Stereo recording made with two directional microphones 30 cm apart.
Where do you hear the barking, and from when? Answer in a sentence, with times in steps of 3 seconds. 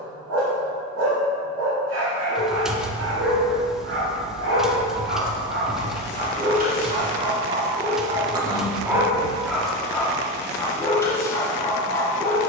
In this clip you hear the barking on the right from 0 s and in the centre from 9 s.